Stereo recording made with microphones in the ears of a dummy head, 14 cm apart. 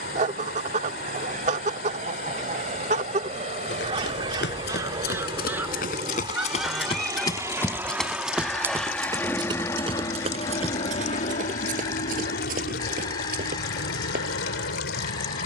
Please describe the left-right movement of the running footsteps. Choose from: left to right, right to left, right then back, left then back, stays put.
left to right.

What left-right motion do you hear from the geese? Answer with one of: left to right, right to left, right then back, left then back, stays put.
right to left.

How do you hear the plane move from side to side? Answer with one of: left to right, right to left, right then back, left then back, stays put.
right to left.